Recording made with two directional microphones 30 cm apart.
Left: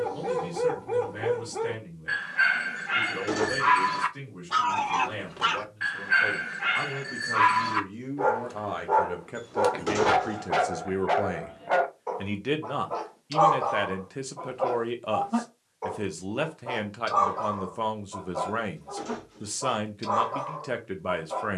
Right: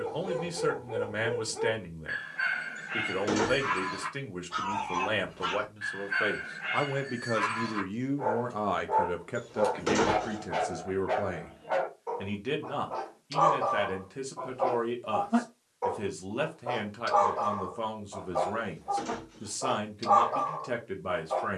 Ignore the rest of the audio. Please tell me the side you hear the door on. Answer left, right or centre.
centre.